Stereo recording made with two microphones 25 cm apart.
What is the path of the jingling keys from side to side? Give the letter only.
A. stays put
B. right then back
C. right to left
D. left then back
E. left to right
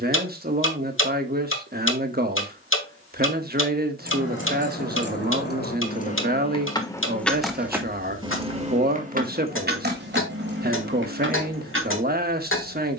E.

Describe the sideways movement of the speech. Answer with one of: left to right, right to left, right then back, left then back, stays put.
stays put.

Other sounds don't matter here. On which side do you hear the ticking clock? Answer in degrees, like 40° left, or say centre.
60° left.